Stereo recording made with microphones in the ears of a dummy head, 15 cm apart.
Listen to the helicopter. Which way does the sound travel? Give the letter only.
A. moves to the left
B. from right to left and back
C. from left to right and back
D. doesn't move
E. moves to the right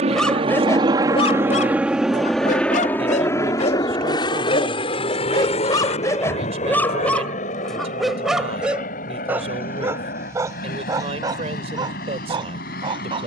A.